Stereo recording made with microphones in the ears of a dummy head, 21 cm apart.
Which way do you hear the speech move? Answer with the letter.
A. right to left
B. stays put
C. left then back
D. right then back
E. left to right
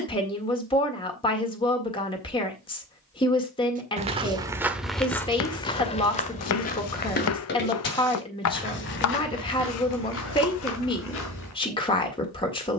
B.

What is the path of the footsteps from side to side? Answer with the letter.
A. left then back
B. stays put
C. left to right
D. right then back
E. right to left
E.